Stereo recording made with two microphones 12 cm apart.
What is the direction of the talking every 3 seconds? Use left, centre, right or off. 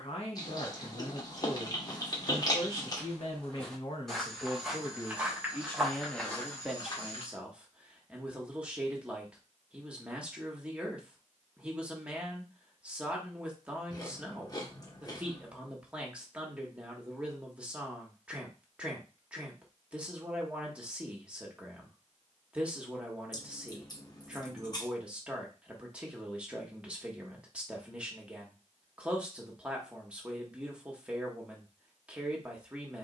left, left, centre, centre, centre, centre, centre, centre, centre, centre, centre.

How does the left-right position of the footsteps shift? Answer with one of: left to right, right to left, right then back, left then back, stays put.
right then back.